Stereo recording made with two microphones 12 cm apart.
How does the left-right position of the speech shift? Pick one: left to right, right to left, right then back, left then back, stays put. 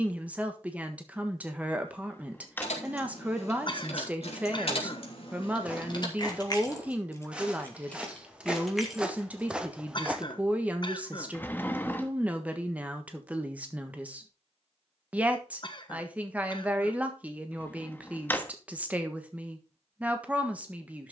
stays put.